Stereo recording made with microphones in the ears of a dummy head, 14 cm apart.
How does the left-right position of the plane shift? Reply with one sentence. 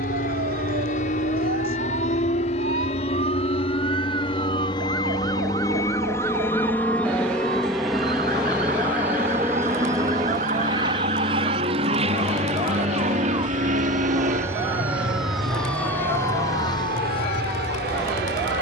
In this clip you hear the plane move from left to right.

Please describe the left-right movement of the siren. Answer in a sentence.
In this clip you hear the siren move to the left.